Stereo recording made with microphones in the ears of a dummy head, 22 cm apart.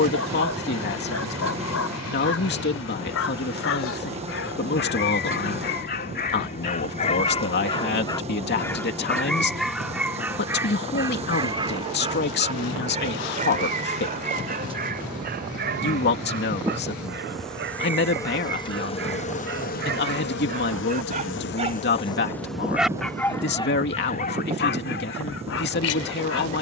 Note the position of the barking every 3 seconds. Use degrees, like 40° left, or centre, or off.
70° left, 50° left, 30° left, 10° right, 30° right, 40° right, 50° right, centre, 50° left.